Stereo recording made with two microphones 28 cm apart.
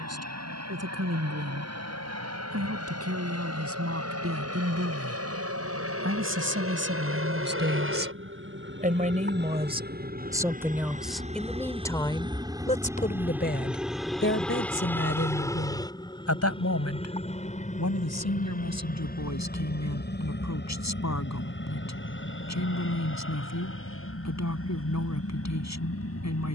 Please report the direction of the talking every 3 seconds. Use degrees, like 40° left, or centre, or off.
60° right, 50° right, 40° right, 10° right, 40° left, 60° left, 70° left, 80° left, 80° left.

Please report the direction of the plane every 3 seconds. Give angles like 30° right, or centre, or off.
70° right, 70° right, 50° right, 30° right, 10° right, 20° left, 30° left, 40° left, 50° left.